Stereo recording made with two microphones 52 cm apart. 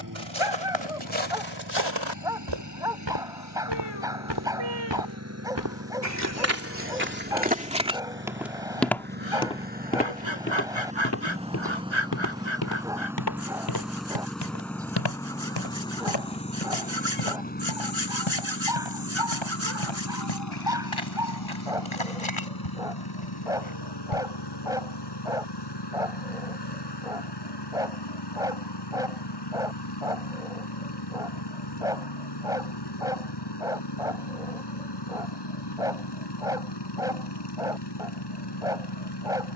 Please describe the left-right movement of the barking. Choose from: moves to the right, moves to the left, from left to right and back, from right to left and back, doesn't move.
doesn't move.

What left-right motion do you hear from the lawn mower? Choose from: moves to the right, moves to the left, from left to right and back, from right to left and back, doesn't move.
moves to the left.